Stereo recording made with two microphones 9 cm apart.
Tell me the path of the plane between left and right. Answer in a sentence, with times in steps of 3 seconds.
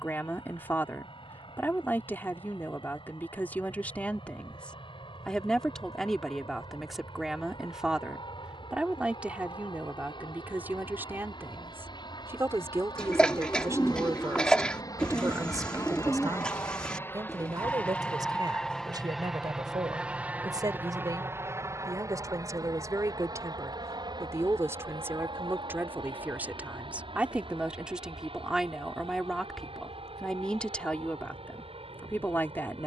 You can hear the plane on the left from 0 s, in the centre from 18 s and on the right from 21 s.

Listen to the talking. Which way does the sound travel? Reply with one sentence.
In this clip you hear the talking move from left to right and back again.